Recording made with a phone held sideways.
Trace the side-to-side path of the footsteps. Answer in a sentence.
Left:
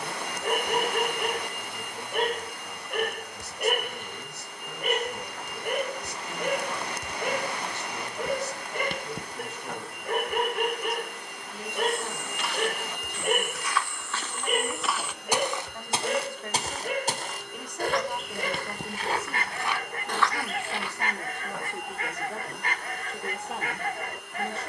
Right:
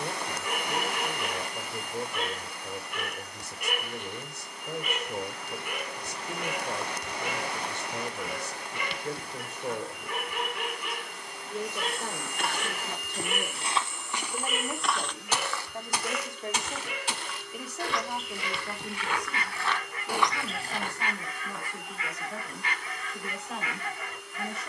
In this clip you hear the footsteps move from right to left and back again.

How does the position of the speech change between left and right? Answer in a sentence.
In this clip you hear the speech travel towards the left.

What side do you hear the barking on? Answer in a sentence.
You can hear the barking on the left.